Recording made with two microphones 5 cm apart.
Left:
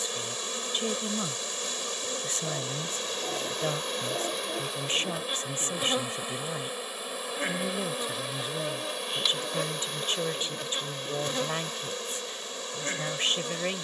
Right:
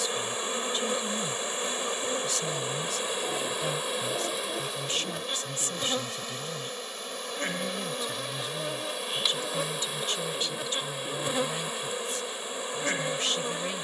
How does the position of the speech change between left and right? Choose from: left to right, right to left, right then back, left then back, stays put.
stays put.